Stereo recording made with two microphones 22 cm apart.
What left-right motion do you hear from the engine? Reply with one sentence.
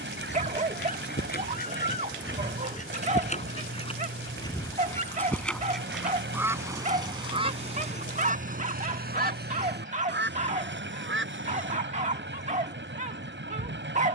You can hear the engine stay in one place.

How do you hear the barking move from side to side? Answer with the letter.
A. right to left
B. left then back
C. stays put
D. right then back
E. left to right
C.